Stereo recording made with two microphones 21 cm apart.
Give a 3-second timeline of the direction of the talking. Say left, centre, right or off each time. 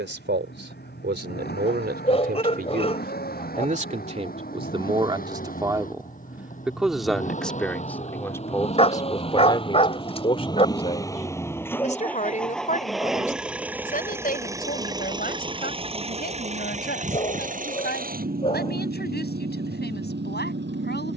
right, right, centre, left, left, left, left.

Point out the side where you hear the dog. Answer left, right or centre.
left.